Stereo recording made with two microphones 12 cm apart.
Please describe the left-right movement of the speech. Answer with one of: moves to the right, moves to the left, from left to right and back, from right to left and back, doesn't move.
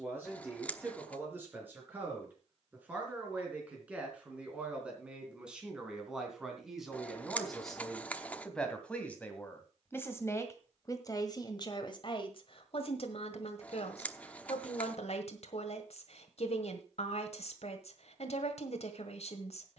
moves to the left.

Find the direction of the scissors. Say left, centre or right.
centre.